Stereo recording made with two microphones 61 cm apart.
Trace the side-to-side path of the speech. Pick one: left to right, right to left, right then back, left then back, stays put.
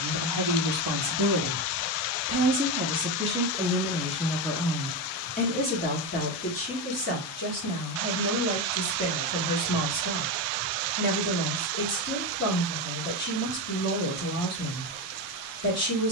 right to left.